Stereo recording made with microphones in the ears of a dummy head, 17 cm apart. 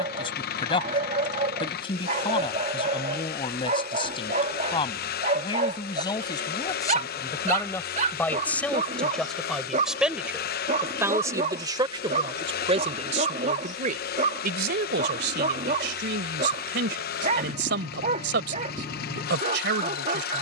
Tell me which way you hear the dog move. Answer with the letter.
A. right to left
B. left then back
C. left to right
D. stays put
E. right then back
D.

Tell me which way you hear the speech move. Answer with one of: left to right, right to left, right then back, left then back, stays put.
left to right.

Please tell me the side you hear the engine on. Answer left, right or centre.
left.